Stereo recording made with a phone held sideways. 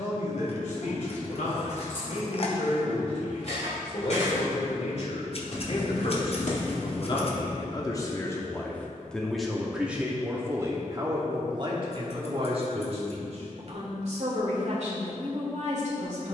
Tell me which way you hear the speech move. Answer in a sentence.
In this clip you hear the speech move to the right.